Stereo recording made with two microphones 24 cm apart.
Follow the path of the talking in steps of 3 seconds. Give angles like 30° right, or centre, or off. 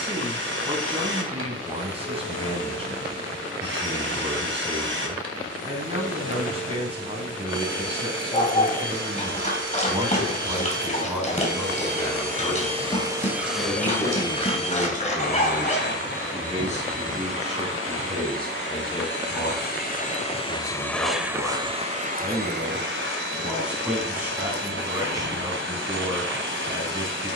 20° right, 20° right, 20° right, 10° right, 30° left, 30° left, 20° left, centre, 10° right.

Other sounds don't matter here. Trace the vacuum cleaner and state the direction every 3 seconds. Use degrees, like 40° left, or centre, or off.
50° right, 50° right, 50° right, 50° right, centre, 50° left, 40° left, 40° right, 50° right.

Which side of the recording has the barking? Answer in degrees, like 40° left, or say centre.
30° left.